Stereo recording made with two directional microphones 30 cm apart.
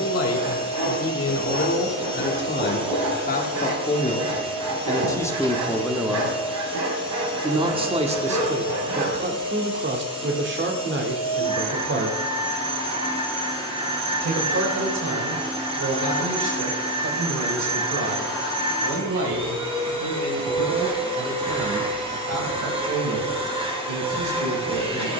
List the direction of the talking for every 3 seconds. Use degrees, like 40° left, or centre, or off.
40° left, 20° left, 20° right, 40° right, 50° right, 60° right, 60° right, 70° right, 70° right.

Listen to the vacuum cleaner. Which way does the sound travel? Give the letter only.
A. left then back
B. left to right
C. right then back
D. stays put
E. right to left
D.